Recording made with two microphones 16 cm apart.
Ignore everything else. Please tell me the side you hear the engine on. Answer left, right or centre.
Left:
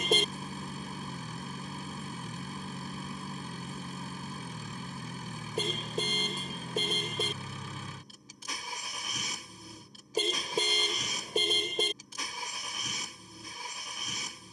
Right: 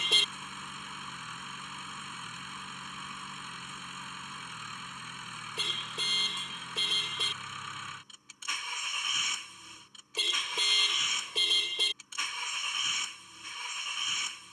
left.